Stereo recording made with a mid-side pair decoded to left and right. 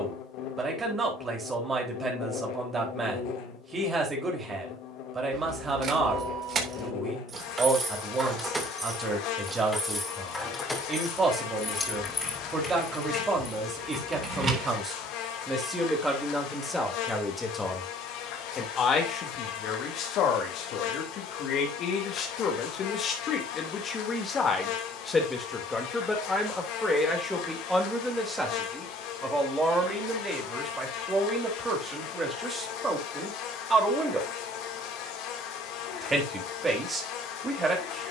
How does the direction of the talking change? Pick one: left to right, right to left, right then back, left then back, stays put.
left then back.